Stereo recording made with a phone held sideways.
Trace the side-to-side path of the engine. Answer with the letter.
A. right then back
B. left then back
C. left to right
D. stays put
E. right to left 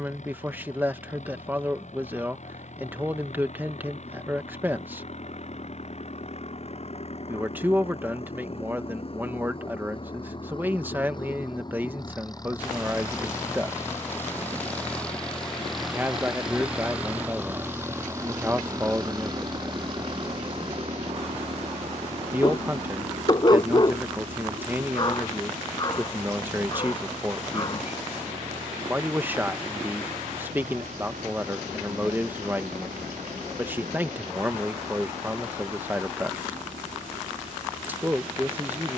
C.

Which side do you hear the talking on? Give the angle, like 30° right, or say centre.
10° right.